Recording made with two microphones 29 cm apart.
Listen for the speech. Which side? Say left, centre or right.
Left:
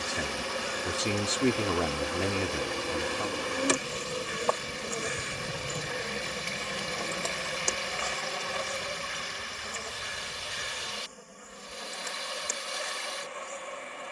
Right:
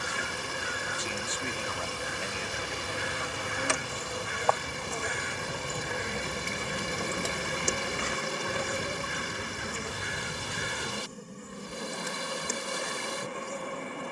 left.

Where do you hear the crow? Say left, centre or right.
right.